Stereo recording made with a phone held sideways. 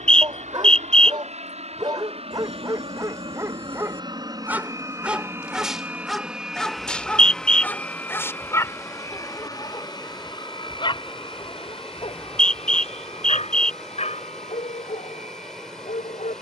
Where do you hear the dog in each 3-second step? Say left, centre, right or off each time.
right, centre, centre, left, left, left.